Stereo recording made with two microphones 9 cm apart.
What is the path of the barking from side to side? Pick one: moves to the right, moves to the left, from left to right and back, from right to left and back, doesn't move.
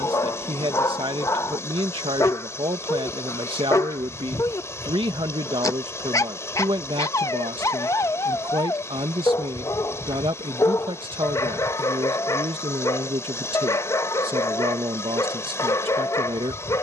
doesn't move.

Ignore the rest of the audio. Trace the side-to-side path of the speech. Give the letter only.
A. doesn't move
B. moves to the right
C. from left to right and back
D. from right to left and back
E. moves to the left
A.